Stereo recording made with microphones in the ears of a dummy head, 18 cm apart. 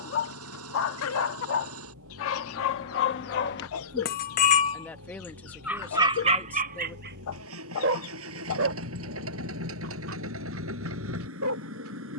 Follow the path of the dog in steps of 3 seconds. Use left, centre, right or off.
left, left, right, right.